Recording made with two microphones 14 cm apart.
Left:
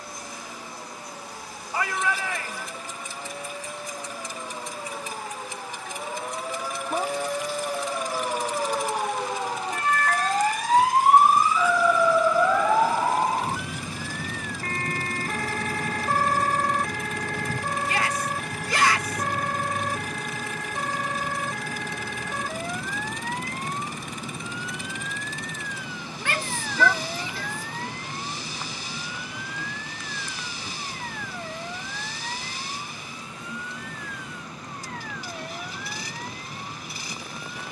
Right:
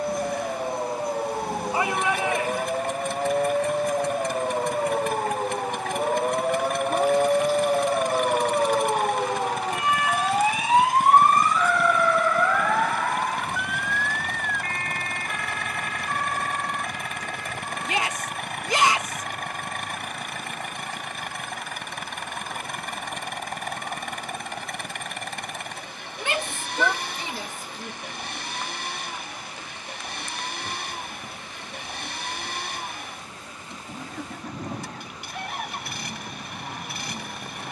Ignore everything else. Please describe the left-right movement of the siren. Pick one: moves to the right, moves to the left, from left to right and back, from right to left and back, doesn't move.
moves to the left.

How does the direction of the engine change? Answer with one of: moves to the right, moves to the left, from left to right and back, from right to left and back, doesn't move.
doesn't move.